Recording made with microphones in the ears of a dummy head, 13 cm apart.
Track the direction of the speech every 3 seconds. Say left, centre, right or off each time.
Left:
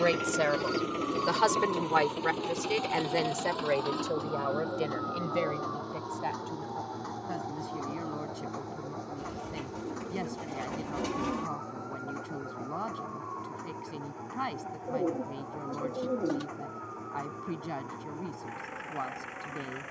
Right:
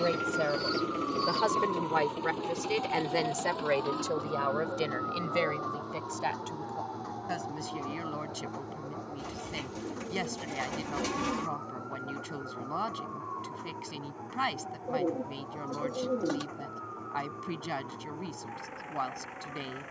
left, right, right, right, right, right, right.